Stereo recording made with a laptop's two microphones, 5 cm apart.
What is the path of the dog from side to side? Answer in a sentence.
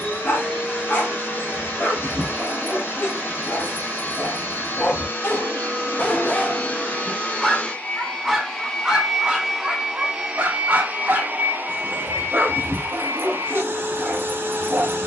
You can hear the dog go from the left side to the right.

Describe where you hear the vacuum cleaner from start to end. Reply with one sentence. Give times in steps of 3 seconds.
You can hear the vacuum cleaner on the left from 0 s and on the right from 9 s.